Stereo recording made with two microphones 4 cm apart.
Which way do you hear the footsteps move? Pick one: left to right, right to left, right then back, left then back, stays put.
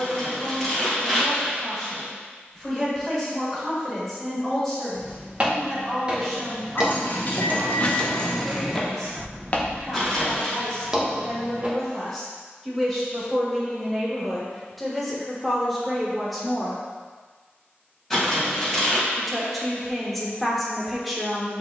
left then back.